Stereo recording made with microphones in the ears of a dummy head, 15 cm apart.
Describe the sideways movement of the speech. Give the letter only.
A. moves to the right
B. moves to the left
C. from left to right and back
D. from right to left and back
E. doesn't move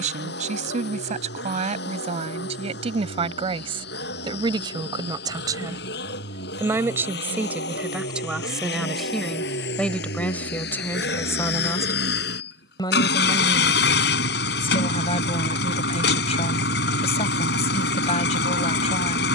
B.